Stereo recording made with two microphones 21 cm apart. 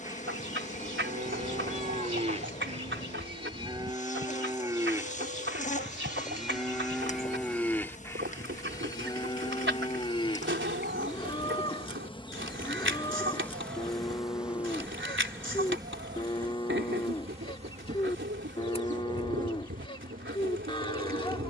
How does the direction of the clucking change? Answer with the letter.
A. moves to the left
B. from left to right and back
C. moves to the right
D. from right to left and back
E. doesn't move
E.